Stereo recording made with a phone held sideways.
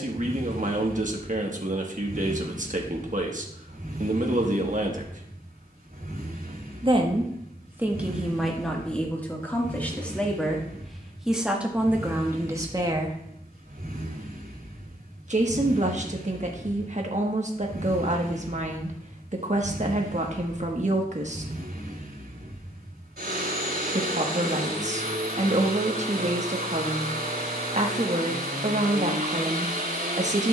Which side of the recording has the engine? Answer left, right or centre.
right.